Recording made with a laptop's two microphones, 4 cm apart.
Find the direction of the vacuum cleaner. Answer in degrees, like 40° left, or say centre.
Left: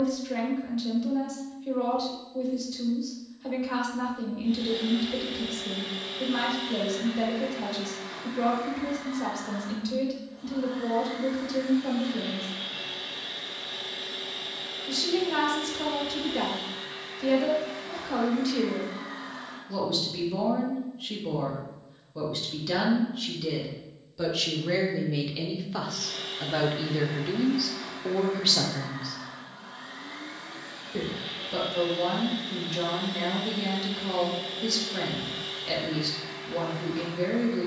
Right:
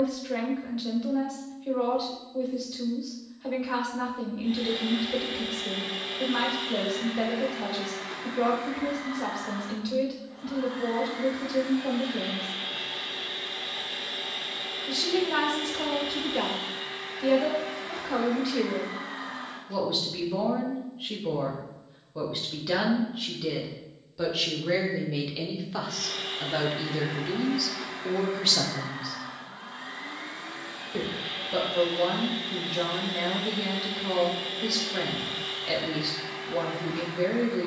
60° right.